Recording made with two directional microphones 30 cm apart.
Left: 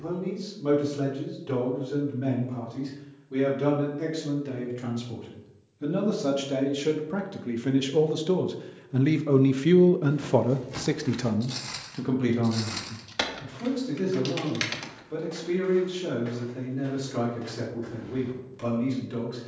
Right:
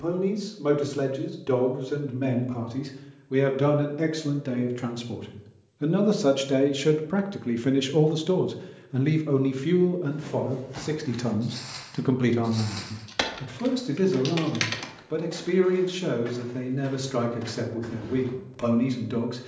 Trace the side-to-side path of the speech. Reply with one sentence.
You can hear the speech go left and come back.